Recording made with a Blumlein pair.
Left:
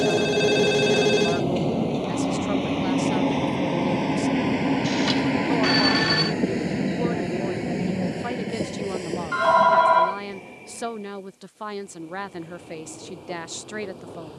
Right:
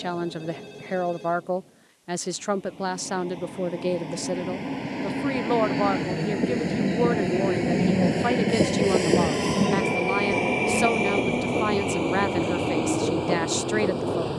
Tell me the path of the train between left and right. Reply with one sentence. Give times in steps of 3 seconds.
You can hear the train on the left from 0 s, in the centre from 6 s and on the right from 9 s.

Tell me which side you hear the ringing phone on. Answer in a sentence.
You can hear the ringing phone on the left.